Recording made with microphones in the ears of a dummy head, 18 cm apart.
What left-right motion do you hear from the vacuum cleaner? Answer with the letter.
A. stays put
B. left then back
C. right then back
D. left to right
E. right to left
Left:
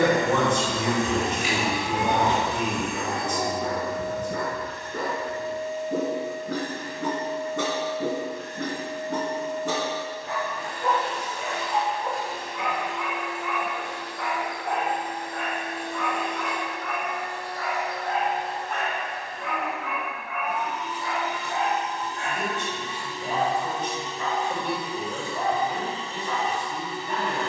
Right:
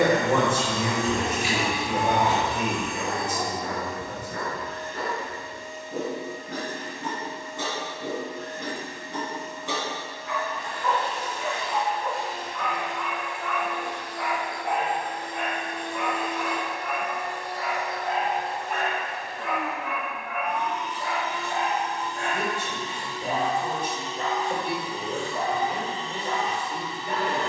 C.